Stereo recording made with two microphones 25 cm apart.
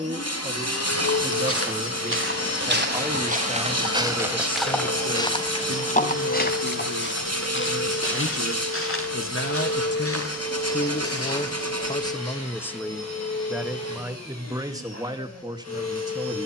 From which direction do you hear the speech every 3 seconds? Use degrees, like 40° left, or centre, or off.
20° right, 20° left, 70° left, 40° left, centre, 20° right.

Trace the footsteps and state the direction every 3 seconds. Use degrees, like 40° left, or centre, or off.
50° right, centre, 50° left, 60° left, off, off.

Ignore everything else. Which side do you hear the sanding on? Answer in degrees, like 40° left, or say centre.
80° right.